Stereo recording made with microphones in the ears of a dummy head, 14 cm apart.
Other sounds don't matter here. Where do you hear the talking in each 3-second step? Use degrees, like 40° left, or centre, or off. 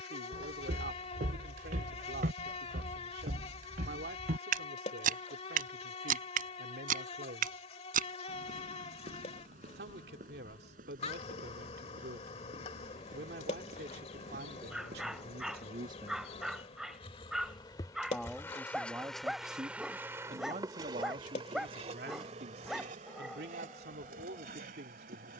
70° right, 70° right, 70° right, 70° right, 70° right, 60° right, 20° right, 70° right, 70° right.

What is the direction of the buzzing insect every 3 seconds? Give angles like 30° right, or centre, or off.
40° left, 40° left, 40° left, 40° left, 40° left, 40° left, centre, 50° right, 60° right.